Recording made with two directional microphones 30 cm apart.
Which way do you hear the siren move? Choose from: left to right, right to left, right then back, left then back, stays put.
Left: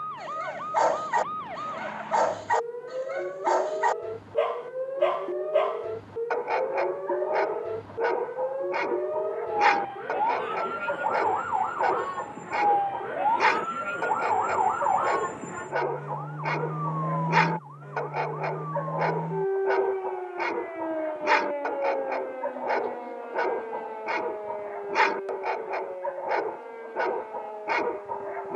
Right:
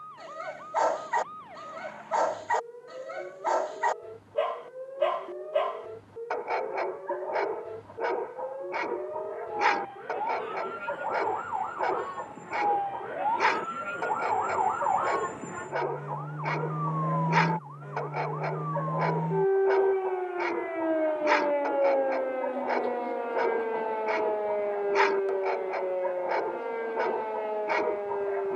left to right.